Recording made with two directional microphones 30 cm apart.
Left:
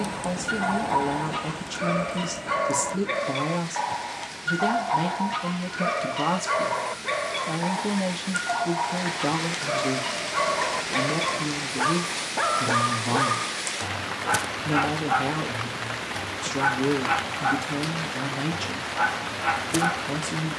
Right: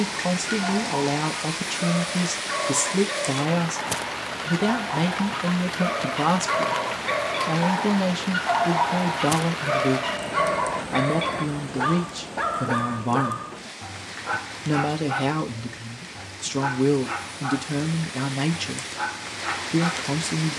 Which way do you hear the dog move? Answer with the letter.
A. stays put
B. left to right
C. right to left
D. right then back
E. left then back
D.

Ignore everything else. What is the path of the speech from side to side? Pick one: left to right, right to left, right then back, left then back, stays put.
stays put.